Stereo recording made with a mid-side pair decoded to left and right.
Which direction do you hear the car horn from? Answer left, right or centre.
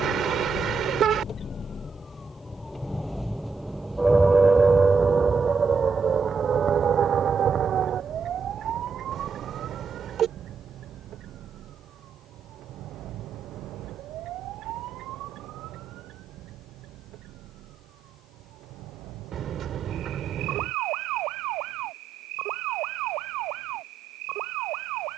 right.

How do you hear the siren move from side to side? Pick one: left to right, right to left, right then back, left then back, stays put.
left to right.